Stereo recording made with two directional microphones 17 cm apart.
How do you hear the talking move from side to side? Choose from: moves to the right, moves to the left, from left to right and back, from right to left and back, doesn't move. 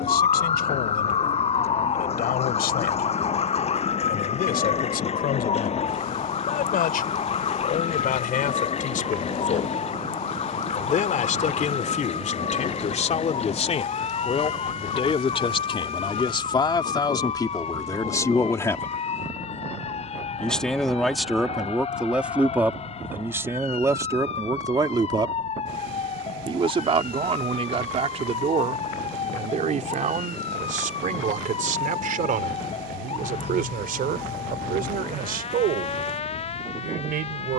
moves to the right.